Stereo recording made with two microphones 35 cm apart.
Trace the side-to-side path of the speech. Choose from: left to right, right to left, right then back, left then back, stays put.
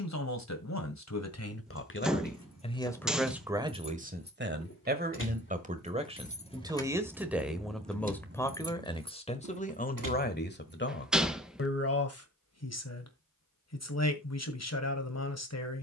right then back.